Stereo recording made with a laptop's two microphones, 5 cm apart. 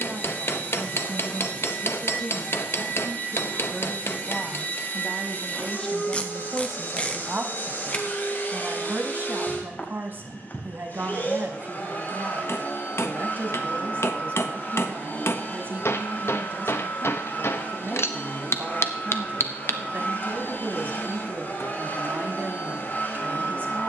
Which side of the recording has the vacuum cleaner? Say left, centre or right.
left.